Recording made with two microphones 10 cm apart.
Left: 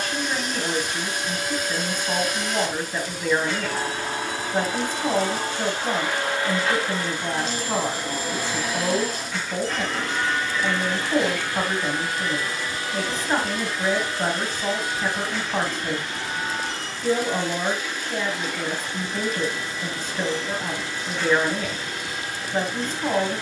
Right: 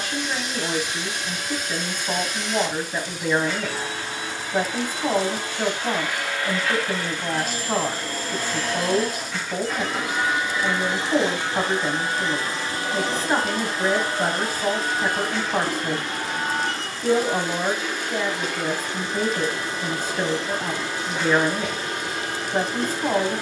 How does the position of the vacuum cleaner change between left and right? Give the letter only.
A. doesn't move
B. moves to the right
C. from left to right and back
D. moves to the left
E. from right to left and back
B.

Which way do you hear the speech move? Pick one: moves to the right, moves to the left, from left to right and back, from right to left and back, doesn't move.
doesn't move.